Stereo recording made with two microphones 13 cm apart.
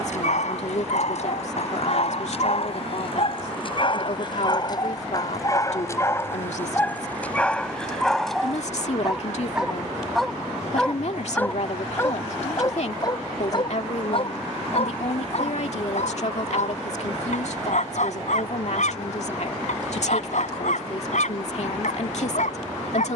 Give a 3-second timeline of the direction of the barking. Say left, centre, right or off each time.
left, left, centre, centre, left, left, left, left.